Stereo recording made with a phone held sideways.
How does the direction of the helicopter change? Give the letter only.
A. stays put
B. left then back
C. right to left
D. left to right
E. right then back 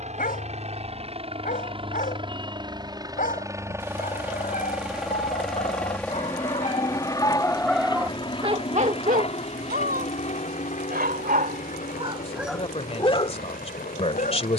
C.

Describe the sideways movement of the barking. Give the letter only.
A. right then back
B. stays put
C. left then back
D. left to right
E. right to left
A.